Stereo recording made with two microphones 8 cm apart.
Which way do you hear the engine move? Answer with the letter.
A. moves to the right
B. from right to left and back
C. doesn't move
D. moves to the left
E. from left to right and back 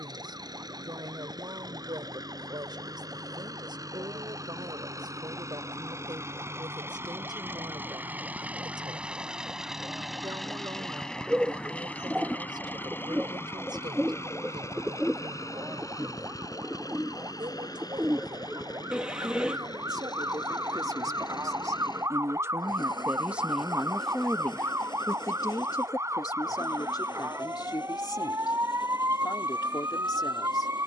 D.